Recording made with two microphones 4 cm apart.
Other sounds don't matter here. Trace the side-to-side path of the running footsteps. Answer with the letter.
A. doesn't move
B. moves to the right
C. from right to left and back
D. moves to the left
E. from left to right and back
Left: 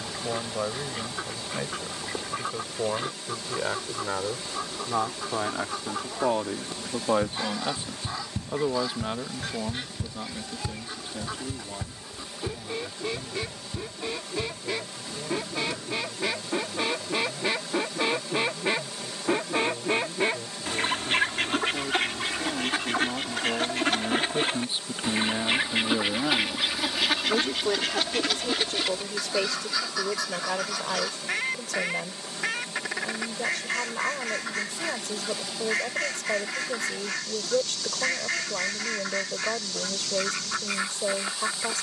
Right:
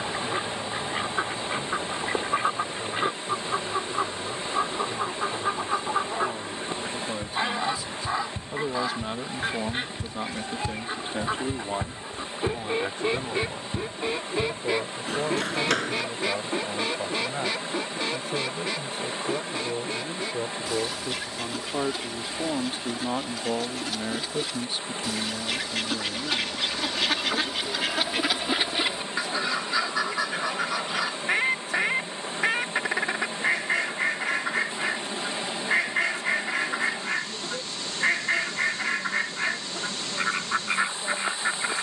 B.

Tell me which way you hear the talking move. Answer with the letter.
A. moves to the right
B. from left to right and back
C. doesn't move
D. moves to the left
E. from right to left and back
B.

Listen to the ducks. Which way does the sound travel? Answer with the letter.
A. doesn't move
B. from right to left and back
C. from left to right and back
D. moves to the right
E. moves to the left
B.